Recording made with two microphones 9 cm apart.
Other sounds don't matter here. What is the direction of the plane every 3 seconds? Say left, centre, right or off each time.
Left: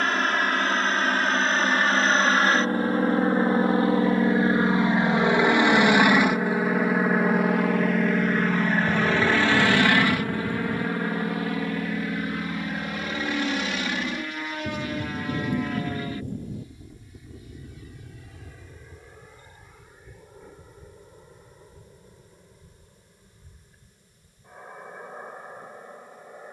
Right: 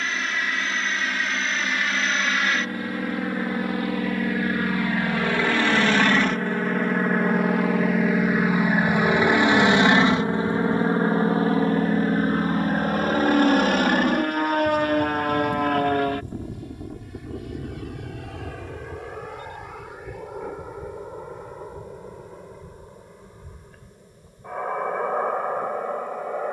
left, left, centre, right, right, right, right, right, right.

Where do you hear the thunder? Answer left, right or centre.
left.